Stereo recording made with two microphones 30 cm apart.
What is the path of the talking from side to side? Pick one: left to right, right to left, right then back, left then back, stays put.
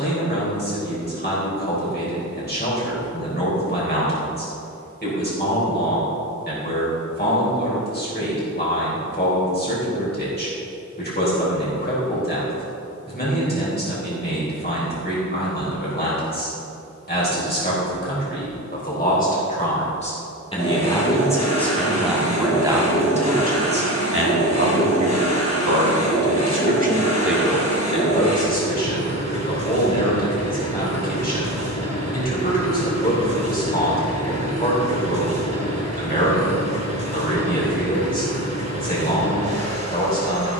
right then back.